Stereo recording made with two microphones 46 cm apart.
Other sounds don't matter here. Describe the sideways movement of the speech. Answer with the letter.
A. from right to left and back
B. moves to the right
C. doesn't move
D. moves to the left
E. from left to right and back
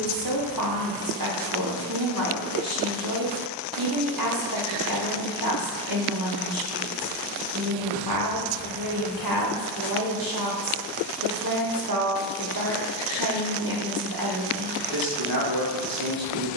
C.